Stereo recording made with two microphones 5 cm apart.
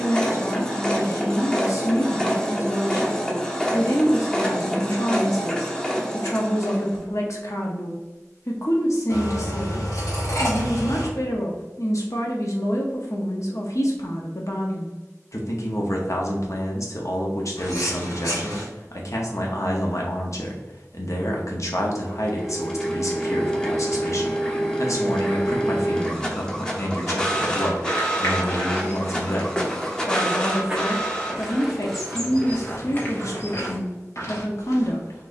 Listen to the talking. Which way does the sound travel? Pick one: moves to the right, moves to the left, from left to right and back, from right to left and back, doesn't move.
doesn't move.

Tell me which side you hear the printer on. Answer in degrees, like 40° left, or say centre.
10° left.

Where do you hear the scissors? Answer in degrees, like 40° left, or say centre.
80° left.